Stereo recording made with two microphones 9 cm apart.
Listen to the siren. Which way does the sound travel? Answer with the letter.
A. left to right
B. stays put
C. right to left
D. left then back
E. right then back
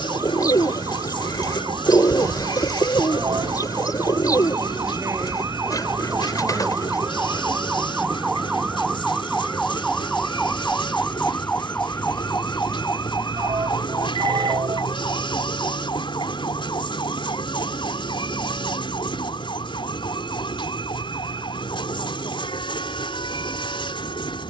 C.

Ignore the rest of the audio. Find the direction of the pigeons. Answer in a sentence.
In this clip you hear the pigeons on the left.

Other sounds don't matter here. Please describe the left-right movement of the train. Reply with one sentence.
You can hear the train stay put.